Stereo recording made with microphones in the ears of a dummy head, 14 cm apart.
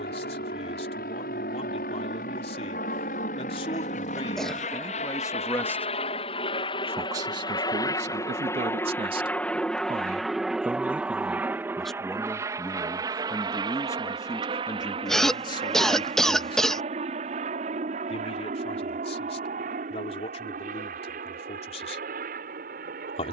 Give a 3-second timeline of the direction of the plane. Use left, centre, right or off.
left, left, left, centre, right, right, right, right.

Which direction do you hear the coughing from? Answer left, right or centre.
centre.